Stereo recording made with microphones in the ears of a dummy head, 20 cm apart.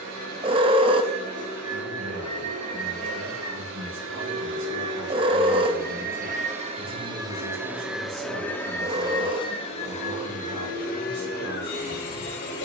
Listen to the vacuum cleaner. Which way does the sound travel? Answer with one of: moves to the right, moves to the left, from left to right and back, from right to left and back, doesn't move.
moves to the left.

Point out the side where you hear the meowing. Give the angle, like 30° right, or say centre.
20° right.